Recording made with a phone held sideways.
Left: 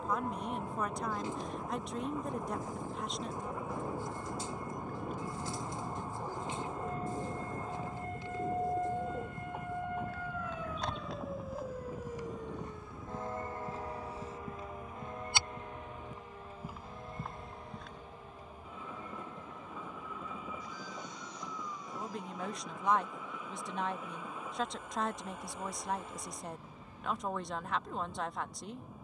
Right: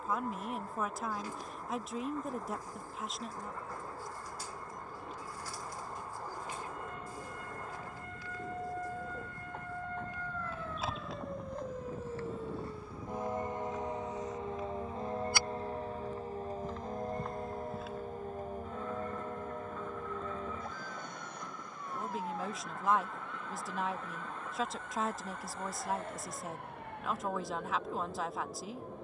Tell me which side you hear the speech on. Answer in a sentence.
In this clip you hear the speech in the centre.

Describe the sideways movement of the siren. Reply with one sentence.
You can hear the siren move to the right.